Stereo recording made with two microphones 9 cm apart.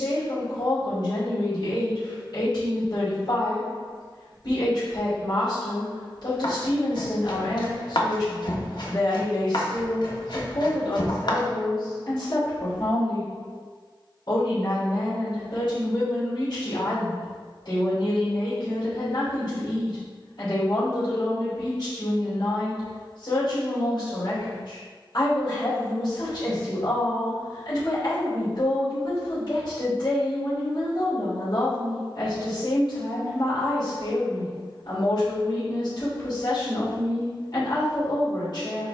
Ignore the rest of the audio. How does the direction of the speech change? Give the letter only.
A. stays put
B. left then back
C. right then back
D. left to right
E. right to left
A.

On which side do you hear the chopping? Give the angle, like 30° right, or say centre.
60° left.